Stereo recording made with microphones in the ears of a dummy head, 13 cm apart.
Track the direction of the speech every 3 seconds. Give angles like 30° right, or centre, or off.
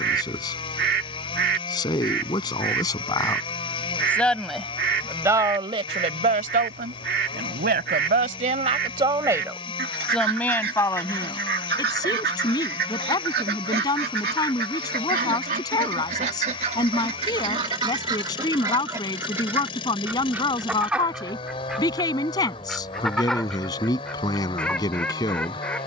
30° left, centre, 50° right, 10° left, 30° left, 30° left, 30° left, 30° left, 30° left.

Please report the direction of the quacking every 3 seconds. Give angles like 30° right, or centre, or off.
70° right, 70° right, 70° right, 70° right, 70° right, 40° right, 20° right, centre, 10° left.